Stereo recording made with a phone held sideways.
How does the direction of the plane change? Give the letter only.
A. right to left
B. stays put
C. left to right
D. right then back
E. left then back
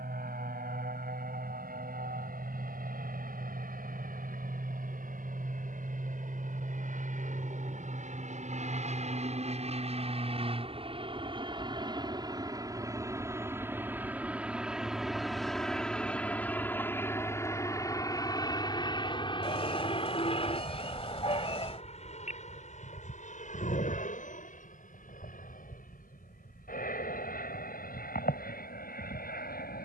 A.